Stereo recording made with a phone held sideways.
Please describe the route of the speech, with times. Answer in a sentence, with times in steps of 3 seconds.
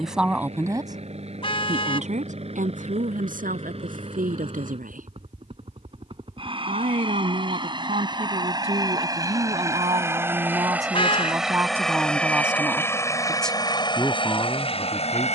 In this clip you hear the speech on the right from 0 s and in the centre from 12 s.